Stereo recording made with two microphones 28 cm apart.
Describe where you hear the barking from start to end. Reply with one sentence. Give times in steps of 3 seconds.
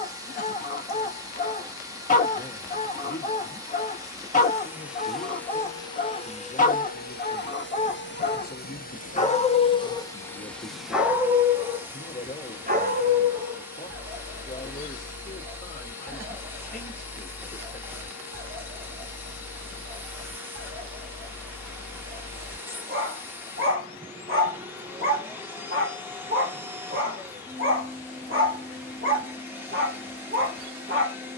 In this clip you hear the barking on the left from 0 s, in the centre from 9 s and on the right from 12 s.